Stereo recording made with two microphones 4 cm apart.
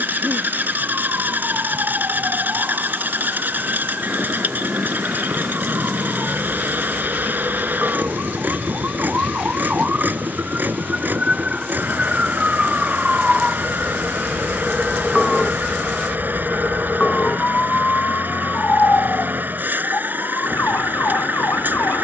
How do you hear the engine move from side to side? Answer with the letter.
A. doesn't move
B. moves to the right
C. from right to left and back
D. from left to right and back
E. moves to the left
A.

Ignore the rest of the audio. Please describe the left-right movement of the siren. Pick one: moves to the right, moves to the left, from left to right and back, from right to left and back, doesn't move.
moves to the left.